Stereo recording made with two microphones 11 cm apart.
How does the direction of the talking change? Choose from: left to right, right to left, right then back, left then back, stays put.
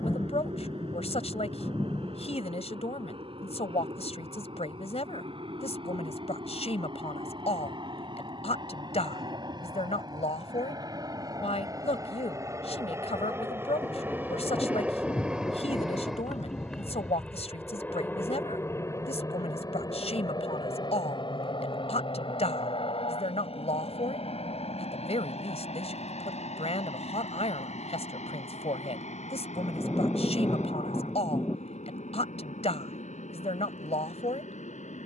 stays put.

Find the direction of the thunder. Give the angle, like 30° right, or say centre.
20° left.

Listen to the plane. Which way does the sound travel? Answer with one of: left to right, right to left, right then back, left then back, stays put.
right to left.